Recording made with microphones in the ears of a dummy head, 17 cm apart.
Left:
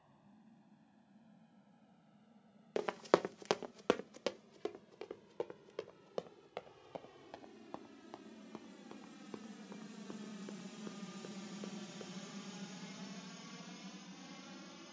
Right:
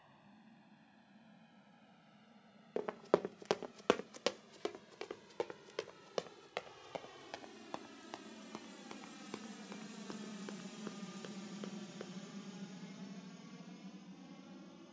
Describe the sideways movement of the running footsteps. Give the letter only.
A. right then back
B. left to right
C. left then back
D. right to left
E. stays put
B.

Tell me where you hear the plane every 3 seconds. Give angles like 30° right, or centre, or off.
60° right, 60° right, 50° right, 10° right, 40° left.